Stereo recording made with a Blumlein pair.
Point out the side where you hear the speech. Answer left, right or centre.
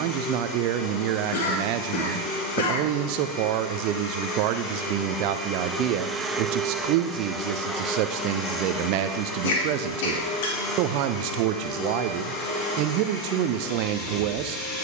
right.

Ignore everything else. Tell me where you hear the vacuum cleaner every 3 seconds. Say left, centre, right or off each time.
left, left, centre, left, left.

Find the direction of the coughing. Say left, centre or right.
left.